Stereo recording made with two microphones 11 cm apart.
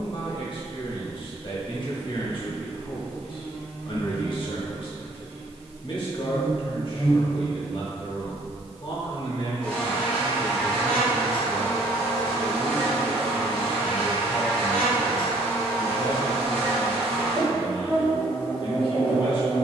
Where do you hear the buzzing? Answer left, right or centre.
centre.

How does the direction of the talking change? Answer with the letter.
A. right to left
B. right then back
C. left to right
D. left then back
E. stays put
E.